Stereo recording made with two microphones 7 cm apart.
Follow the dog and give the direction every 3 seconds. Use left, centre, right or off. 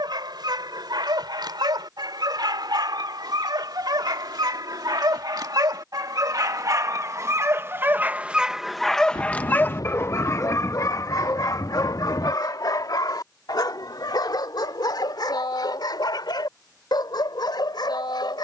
right, right, right, left, left, left.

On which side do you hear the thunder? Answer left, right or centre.
left.